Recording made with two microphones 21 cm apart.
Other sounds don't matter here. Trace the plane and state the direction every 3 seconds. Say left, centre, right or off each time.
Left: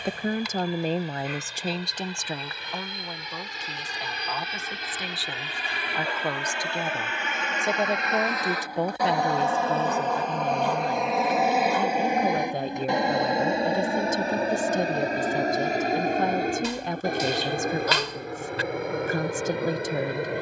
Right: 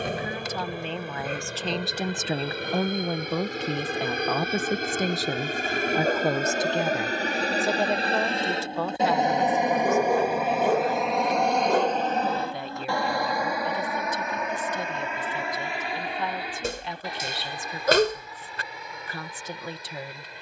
right, right, right, centre, left, left, left.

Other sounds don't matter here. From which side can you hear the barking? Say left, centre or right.
right.